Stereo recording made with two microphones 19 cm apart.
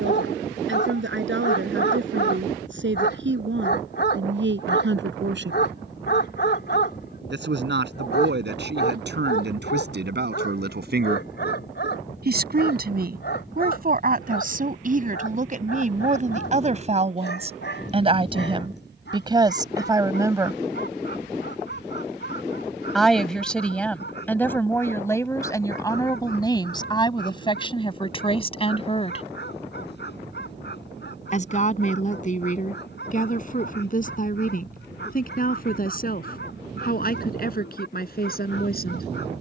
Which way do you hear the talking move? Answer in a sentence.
In this clip you hear the talking travel towards the left.